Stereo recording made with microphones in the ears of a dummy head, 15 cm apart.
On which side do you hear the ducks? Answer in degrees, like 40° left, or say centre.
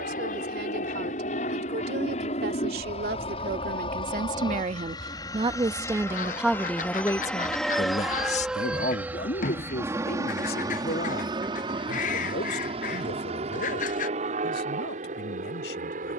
50° left.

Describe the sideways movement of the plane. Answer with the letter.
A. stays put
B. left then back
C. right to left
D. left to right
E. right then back
D.